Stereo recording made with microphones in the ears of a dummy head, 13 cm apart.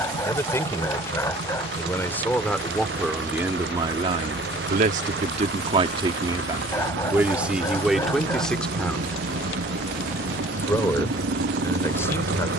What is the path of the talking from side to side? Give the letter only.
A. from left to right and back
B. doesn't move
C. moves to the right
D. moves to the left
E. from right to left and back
A.